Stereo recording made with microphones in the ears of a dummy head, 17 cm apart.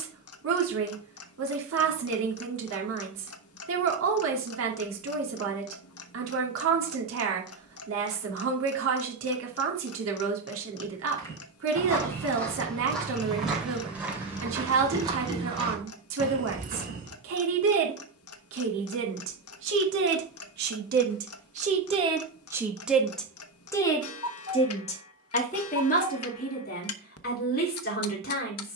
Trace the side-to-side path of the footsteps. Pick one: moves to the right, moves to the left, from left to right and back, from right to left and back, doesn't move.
moves to the right.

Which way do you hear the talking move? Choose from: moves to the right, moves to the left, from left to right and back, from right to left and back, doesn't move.
moves to the left.